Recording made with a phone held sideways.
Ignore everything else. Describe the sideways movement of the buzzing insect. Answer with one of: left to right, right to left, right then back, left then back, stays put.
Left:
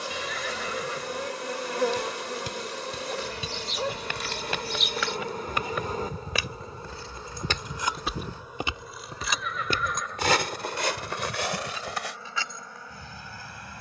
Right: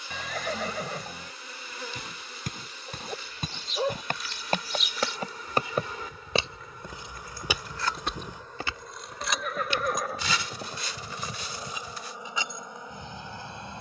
left to right.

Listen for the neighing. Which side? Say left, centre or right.
right.